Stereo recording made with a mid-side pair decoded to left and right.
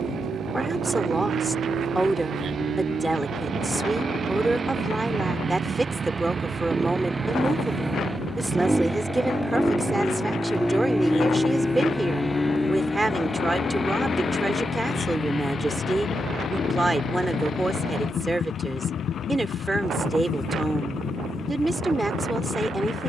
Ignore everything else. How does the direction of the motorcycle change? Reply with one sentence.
You can hear the motorcycle move from right to left.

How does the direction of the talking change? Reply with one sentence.
In this clip you hear the talking stay put.